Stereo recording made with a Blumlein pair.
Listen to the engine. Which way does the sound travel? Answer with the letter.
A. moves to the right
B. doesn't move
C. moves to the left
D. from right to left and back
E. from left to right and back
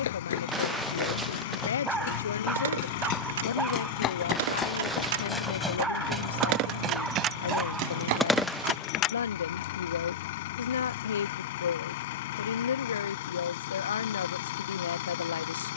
B.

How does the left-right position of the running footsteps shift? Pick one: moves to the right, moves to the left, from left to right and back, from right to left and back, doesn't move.
moves to the right.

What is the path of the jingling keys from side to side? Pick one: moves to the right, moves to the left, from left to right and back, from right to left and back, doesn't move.
moves to the left.